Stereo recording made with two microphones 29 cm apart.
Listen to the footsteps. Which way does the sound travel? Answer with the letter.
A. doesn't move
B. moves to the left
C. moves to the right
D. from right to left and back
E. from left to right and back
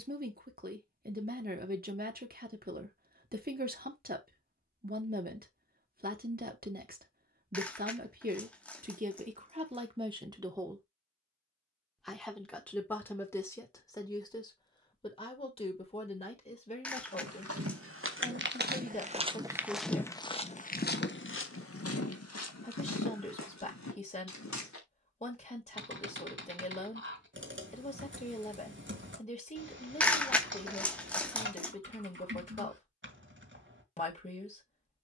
B.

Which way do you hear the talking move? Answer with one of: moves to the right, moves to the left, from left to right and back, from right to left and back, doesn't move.
moves to the left.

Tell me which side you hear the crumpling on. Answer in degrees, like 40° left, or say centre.
centre.